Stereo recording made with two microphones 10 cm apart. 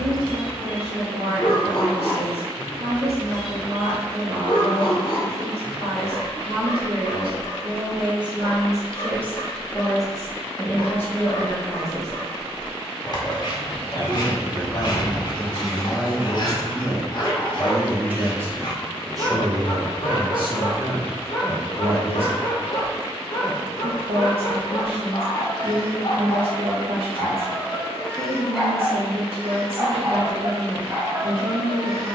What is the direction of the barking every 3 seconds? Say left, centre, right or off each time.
left, left, left, left, left, left, left, left, left, centre, right.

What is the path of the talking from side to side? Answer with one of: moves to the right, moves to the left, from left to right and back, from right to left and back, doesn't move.
from right to left and back.